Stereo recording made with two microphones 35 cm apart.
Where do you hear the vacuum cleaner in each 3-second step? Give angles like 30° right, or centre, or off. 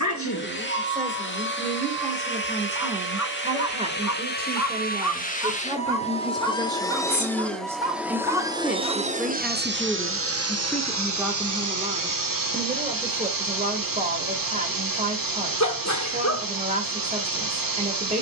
30° left, 30° left, centre, 40° right, 70° right, 70° right.